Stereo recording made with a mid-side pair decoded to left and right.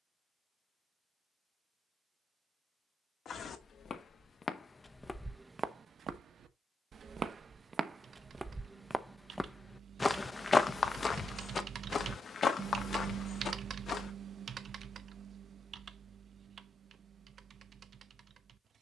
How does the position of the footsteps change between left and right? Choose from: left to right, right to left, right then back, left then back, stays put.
right then back.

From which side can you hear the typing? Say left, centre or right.
right.